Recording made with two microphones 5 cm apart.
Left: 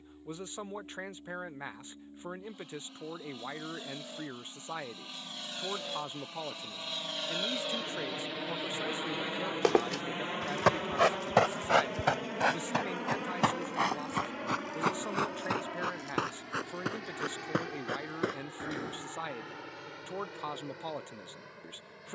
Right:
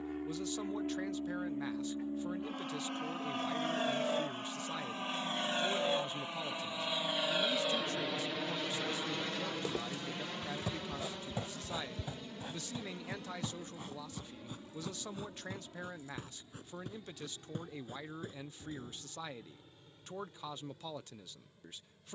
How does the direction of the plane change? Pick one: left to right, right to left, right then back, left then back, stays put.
right to left.